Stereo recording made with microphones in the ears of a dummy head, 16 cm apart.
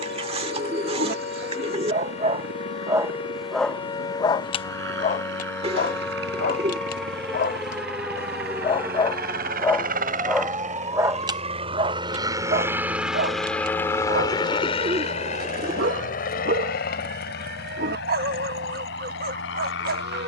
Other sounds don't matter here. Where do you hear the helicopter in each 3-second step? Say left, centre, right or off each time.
right, right, right, right, centre, left, left.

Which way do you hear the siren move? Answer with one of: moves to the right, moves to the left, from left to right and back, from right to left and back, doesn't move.
moves to the right.